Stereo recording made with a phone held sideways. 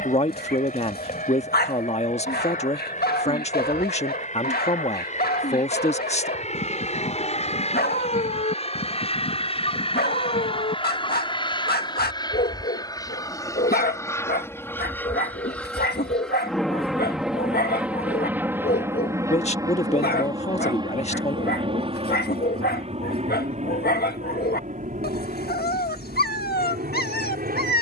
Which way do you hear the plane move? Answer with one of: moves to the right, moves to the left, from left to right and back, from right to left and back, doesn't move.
moves to the right.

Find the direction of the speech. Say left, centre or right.
left.